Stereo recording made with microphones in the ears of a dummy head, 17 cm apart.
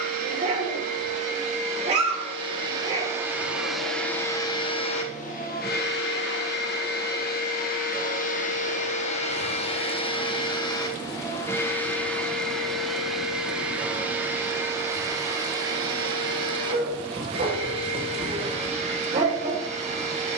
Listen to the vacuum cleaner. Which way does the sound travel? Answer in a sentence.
You can hear the vacuum cleaner go left and come back.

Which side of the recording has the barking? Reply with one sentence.
In this clip you hear the barking on the right.